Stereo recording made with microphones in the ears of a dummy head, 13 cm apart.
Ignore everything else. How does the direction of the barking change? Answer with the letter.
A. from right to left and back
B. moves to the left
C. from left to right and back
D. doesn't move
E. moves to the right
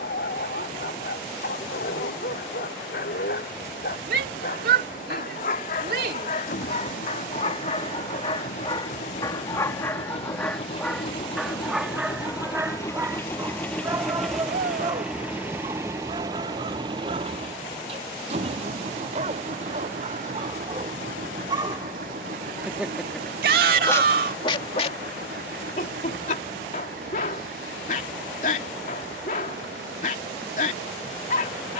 C.